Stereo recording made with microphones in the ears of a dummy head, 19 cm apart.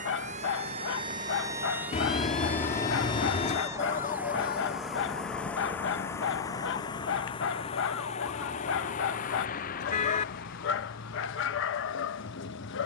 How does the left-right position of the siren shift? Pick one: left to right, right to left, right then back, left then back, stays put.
right to left.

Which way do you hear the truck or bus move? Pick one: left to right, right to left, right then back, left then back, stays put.
right to left.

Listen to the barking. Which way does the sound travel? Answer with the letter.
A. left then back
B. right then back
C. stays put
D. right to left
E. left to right
C.